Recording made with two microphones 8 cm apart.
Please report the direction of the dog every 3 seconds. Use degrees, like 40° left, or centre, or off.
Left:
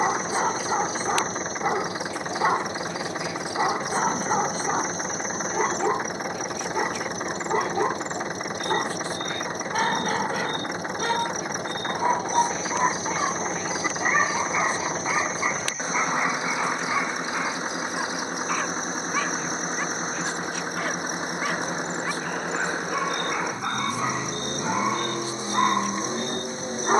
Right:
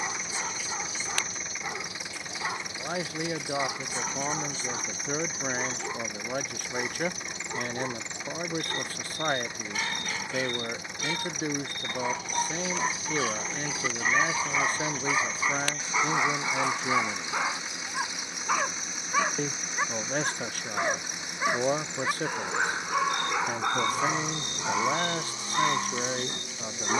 50° left, 50° left, 50° left, 50° left, 30° left, centre, 10° right, 10° right, 20° left.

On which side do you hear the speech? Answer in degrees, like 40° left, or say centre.
50° right.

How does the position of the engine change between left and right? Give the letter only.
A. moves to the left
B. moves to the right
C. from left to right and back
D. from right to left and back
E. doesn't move
E.